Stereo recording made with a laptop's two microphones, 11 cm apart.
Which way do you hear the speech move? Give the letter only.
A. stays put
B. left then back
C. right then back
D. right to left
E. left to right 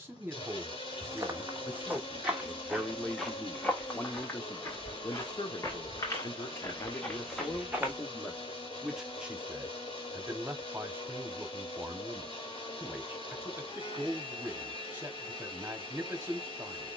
B.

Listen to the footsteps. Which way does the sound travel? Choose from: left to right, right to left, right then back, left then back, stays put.
left then back.